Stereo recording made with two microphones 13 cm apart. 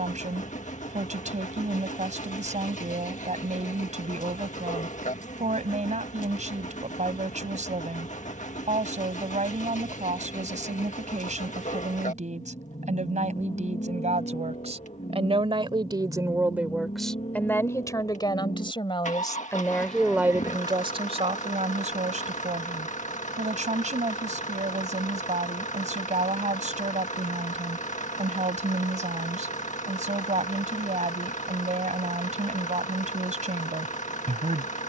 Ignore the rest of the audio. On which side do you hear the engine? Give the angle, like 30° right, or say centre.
70° left.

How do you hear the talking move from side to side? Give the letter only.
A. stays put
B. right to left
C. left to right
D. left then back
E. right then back
D.